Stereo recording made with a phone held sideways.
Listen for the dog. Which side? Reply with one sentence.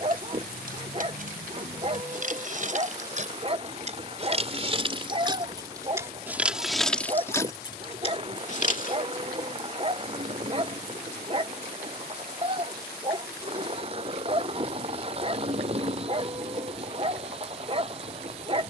In this clip you hear the dog on the right.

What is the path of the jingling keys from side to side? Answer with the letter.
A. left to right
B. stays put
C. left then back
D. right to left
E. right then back
D.